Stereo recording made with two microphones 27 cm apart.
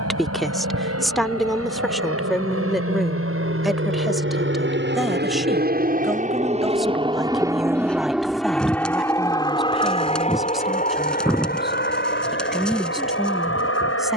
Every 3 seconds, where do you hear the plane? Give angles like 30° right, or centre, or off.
70° right, 50° right, 10° right, 20° left, 40° left.